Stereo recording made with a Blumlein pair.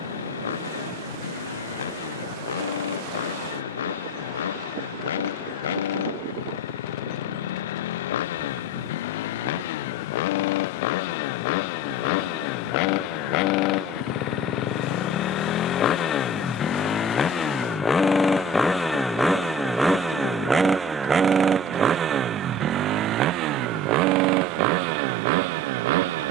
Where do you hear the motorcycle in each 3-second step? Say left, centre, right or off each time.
left, left, left, left, left, left, centre, right, right.